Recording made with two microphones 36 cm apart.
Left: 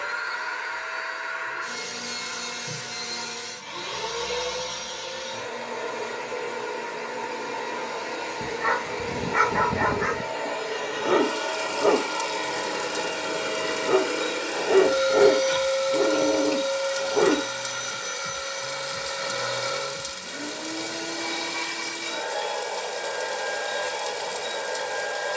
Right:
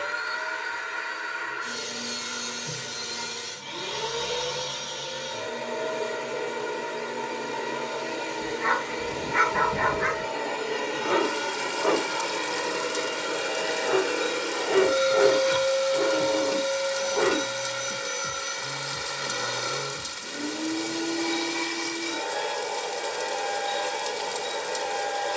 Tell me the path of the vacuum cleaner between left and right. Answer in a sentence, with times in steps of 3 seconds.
You can hear the vacuum cleaner on the right from 0 s, in the centre from 12 s and on the right from 15 s.